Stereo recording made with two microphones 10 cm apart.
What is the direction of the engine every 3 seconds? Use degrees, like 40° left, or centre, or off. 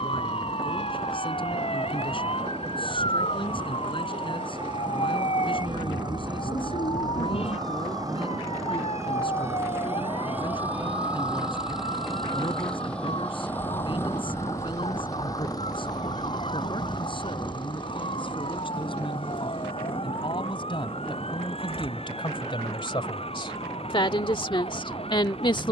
60° right, 50° right, 40° right, 20° right, 20° left, 50° left, 60° left, 70° left, 70° left.